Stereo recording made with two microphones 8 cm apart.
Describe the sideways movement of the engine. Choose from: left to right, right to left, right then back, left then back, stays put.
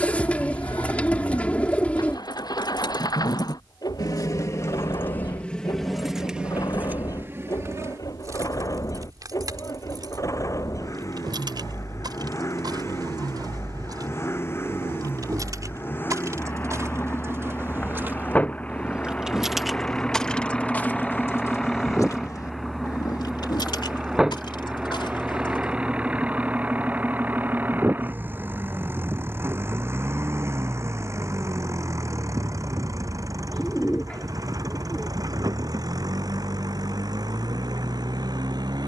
left to right.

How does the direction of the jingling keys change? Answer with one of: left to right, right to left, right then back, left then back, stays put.
right then back.